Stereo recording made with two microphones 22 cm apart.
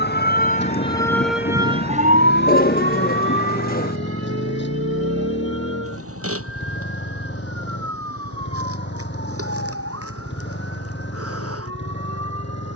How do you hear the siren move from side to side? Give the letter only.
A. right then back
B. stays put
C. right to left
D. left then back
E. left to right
E.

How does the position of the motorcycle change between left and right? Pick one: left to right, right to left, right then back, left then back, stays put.
stays put.